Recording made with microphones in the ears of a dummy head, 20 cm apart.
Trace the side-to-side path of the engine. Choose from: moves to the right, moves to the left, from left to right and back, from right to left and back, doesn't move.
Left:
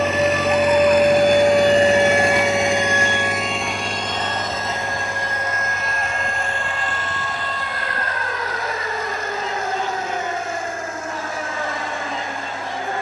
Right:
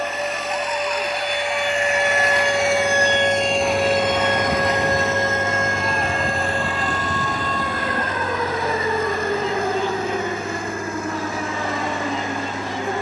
moves to the right.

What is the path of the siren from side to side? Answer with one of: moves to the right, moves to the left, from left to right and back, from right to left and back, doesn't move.
moves to the right.